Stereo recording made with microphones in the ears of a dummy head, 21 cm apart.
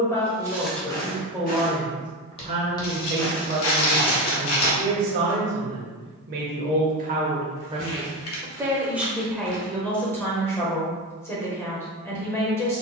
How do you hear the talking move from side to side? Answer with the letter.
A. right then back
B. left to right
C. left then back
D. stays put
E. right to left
A.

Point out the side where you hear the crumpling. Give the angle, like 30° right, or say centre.
70° left.